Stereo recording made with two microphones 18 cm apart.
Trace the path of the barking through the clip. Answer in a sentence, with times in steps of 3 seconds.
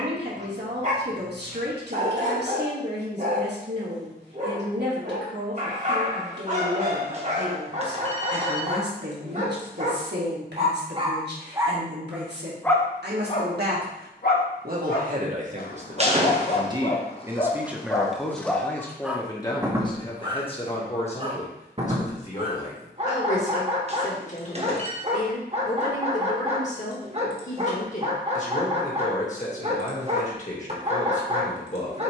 In this clip you hear the barking on the right from 0 s, on the left from 12 s, in the centre from 18 s and on the right from 21 s.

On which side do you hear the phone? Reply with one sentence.
You can hear the phone on the right.